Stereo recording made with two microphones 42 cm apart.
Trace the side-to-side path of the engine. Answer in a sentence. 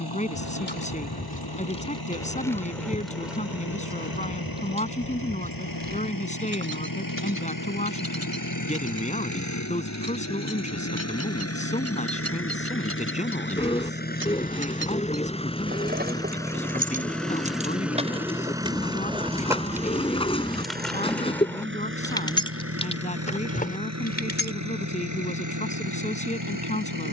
In this clip you hear the engine move to the right.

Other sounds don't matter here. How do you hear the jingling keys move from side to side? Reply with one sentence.
In this clip you hear the jingling keys move from left to right and back again.